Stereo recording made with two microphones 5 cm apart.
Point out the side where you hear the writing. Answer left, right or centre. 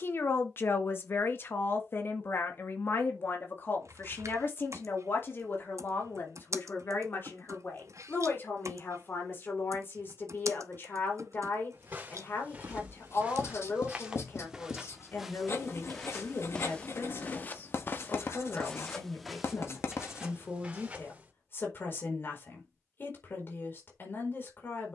left.